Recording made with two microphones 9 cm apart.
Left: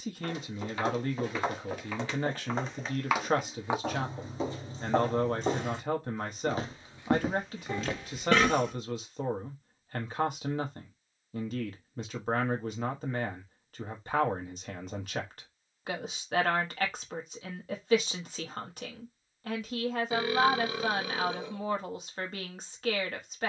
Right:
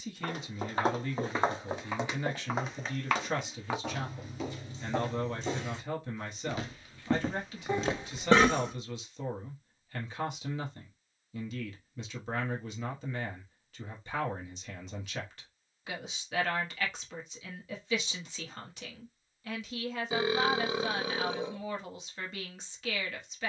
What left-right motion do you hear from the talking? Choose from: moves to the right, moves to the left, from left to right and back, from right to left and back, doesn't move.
doesn't move.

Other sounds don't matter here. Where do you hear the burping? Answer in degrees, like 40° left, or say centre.
30° right.